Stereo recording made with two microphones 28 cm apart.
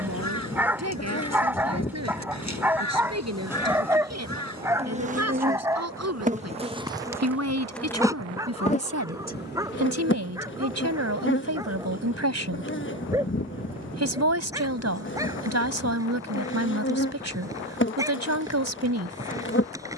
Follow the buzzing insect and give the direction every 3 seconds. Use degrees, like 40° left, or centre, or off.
30° left, 20° right, 10° right, 40° left, 40° left, 40° left, 40° left.